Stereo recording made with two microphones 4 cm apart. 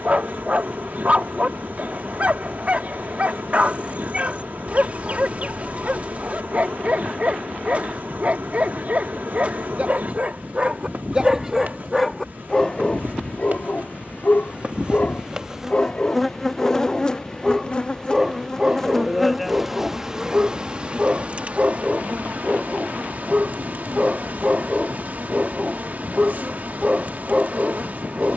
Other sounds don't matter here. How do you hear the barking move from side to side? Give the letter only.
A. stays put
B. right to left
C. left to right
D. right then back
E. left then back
E.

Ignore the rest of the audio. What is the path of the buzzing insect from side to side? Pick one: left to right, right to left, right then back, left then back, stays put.
left then back.